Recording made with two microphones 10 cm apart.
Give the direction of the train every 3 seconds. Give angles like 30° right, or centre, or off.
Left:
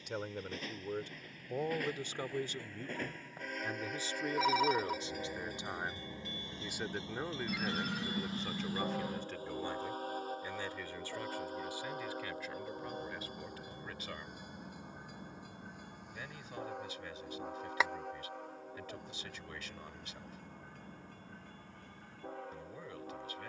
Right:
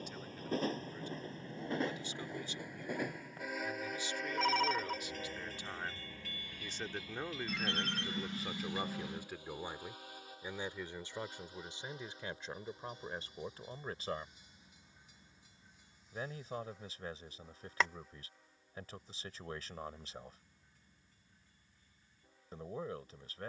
30° right, centre, 30° left, 40° left, 50° left, 60° left, 60° left, 60° left.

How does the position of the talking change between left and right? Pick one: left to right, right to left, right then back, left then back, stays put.
left to right.